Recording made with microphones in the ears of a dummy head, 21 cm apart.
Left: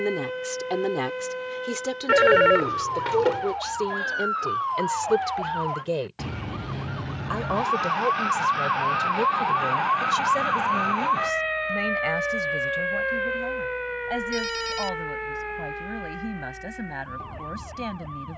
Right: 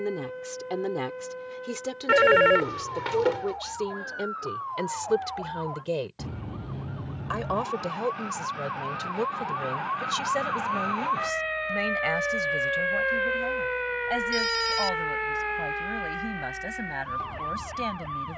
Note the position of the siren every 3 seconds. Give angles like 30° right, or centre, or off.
80° left, 70° left, 50° left, 20° left, 20° right, 50° right.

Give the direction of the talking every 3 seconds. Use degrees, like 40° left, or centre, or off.
10° left, centre, 10° right, 20° right, 20° right, 20° right.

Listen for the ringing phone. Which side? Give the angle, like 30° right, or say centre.
10° right.